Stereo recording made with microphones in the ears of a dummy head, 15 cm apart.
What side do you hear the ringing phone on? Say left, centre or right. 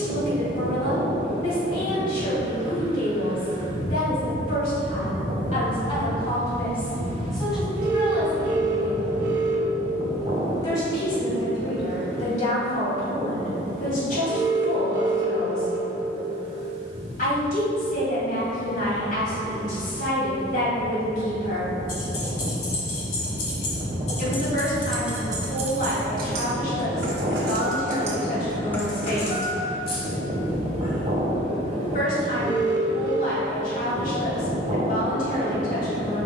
right.